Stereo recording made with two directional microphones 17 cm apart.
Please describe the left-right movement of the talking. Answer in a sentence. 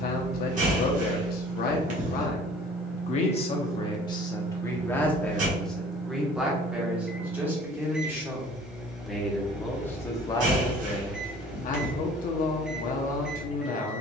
You can hear the talking go right and come back.